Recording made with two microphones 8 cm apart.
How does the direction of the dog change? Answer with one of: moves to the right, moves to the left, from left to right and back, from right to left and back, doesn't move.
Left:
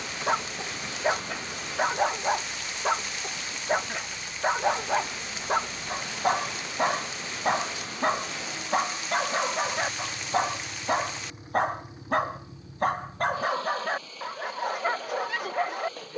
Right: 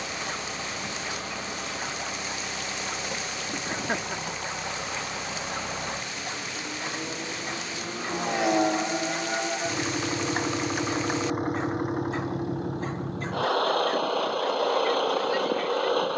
doesn't move.